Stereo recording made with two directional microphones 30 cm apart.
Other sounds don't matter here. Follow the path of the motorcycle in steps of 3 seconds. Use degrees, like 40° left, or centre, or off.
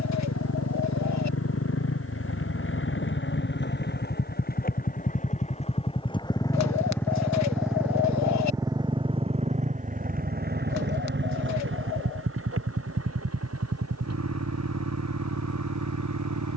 50° left, 30° left, centre, 30° right, 50° right, 60° right.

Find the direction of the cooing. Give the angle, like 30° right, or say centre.
60° left.